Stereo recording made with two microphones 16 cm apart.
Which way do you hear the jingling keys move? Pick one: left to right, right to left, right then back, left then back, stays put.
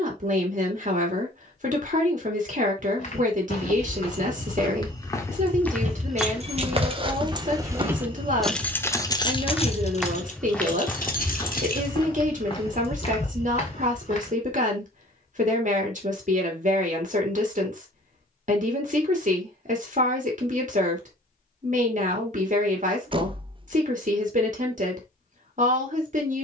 right to left.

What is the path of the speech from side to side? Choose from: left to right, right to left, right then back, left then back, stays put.
stays put.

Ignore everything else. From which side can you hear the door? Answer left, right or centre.
right.